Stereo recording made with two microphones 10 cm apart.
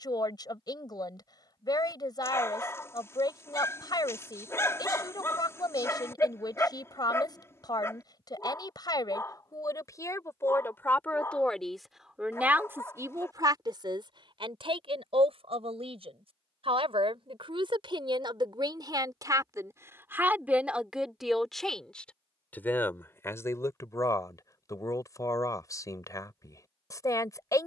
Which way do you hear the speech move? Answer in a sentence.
In this clip you hear the speech move from left to right and back again.